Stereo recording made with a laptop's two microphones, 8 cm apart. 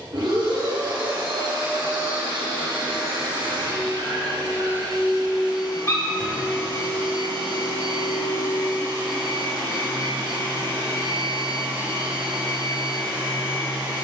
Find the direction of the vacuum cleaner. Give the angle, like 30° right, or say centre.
70° right.